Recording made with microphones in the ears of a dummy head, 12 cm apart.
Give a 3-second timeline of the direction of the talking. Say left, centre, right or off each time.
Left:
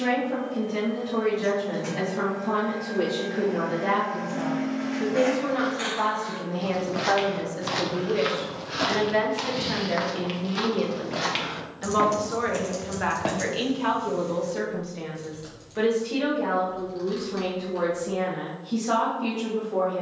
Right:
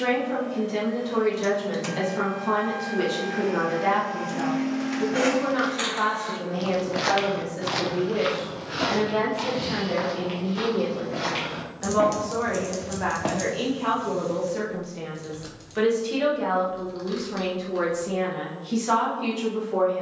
right, right, centre, left, left, right, right.